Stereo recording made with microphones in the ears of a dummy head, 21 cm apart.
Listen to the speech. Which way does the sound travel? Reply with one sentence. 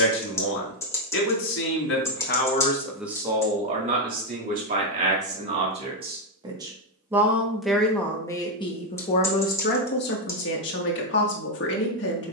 In this clip you hear the speech move from left to right and back again.